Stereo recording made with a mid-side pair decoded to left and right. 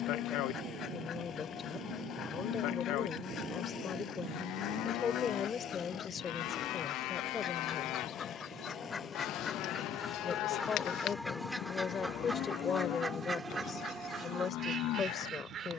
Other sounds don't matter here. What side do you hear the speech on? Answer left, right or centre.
left.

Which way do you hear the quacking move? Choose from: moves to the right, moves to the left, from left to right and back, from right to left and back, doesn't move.
moves to the right.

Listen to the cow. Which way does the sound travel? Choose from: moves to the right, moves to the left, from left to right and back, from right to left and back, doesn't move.
doesn't move.